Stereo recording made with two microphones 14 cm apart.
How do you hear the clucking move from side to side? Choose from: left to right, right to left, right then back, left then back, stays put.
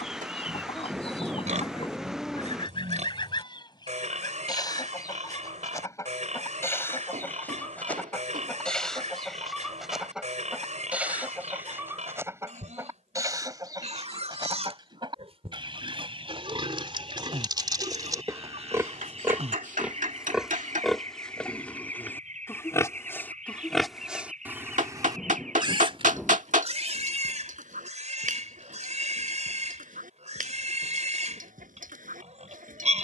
left to right.